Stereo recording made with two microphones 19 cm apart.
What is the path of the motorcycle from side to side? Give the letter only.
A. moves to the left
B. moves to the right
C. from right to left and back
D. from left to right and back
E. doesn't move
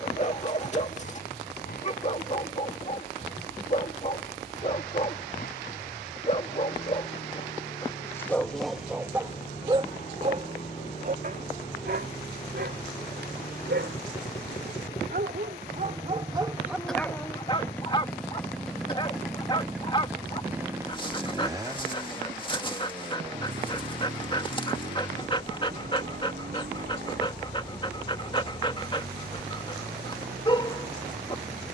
B.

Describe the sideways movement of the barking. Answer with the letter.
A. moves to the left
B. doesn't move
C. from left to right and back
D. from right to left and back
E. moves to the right
C.